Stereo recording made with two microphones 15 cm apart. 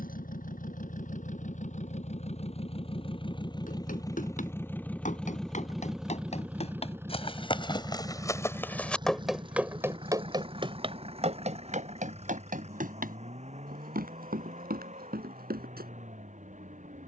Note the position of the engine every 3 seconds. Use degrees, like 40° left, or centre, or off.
50° left, 20° left, 20° right, 40° right, 50° right, 50° right.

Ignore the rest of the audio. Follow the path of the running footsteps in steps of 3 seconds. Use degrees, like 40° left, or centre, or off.
off, 60° left, 30° left, 30° right, 70° right, 80° right.